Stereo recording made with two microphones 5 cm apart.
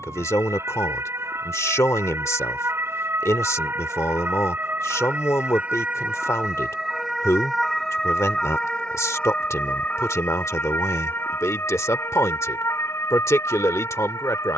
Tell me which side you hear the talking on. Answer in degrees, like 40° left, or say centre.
60° left.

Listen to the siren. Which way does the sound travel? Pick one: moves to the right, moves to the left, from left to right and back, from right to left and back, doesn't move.
moves to the left.